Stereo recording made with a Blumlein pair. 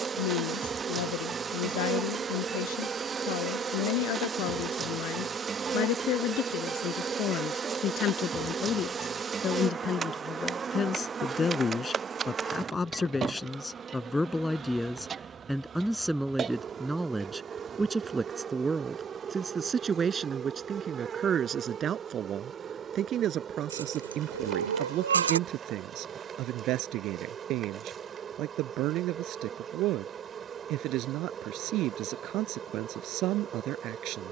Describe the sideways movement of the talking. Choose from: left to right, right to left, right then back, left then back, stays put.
left to right.